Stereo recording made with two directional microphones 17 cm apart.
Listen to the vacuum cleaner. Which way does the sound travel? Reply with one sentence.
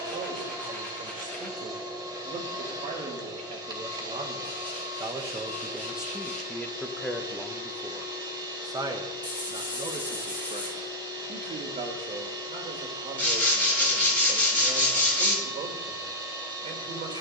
In this clip you hear the vacuum cleaner stay put.